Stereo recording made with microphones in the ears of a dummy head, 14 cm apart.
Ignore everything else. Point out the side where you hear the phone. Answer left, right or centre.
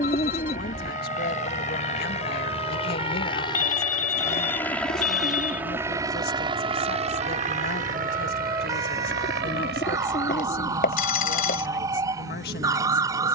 left.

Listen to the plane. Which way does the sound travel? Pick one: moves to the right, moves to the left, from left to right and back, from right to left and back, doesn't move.
moves to the right.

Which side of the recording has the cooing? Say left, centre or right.
left.